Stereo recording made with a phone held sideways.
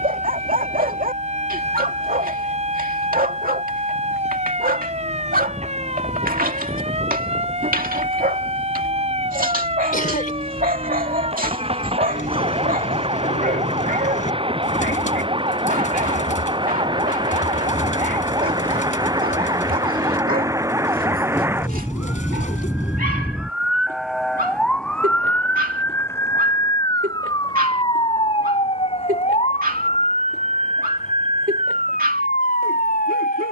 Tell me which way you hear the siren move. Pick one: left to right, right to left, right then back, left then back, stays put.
right to left.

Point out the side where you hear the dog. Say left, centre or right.
right.